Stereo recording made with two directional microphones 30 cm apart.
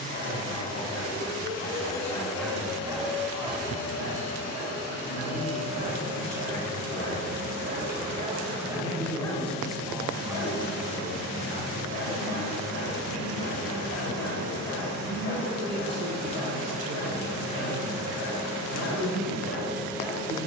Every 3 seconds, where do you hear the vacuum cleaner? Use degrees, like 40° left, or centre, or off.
60° left, 60° left, 60° left, 60° left, 60° left, 30° left, centre.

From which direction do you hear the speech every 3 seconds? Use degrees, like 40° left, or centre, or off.
40° left, 40° left, 30° left, 10° right, 50° right, 50° right, 50° right.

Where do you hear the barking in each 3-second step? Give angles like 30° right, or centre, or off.
30° left, 40° right, 40° right, 30° left, 40° left, 40° left, 40° left.